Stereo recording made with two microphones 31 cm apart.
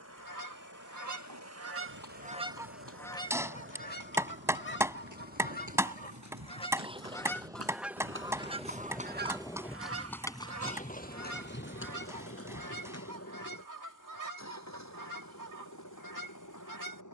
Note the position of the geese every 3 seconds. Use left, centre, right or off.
right, left, centre, right, right, right.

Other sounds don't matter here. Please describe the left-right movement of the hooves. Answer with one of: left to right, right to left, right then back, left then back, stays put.
right to left.